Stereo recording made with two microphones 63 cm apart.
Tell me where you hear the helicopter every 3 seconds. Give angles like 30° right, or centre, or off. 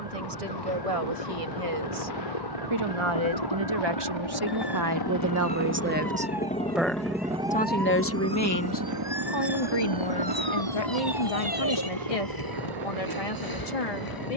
60° left, 40° left, 10° right, 50° right, 60° right.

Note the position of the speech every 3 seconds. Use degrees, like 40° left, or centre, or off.
60° right, 30° right, 10° left, 50° left, 60° left.